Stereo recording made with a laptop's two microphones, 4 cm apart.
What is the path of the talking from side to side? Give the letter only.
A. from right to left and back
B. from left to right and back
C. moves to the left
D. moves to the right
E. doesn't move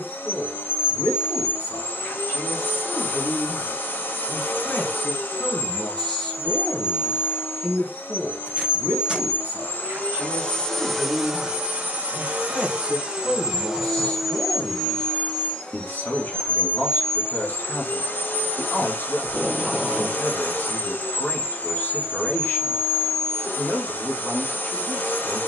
B.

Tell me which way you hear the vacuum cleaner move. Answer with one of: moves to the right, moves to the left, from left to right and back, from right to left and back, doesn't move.
from left to right and back.